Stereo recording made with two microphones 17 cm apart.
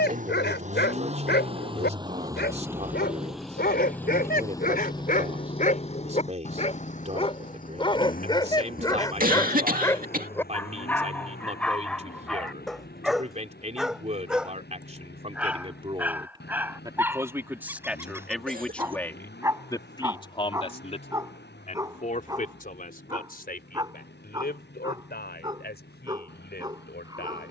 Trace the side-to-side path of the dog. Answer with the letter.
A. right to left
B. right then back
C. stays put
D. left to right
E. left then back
D.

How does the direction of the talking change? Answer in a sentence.
In this clip you hear the talking travel towards the left.